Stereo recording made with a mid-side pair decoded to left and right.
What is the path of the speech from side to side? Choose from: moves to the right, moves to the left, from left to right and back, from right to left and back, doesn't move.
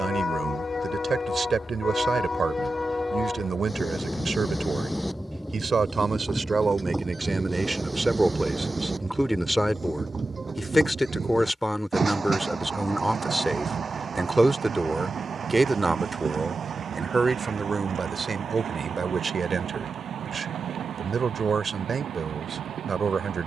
from right to left and back.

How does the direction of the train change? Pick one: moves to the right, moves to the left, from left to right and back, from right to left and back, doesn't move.
moves to the right.